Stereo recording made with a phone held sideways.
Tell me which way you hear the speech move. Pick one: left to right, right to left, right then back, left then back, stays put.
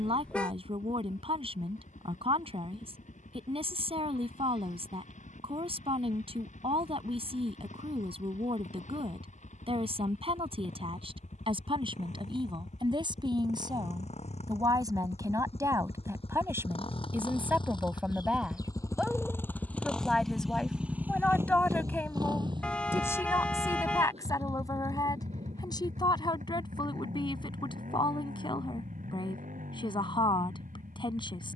right to left.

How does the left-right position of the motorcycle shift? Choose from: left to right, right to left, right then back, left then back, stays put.
left to right.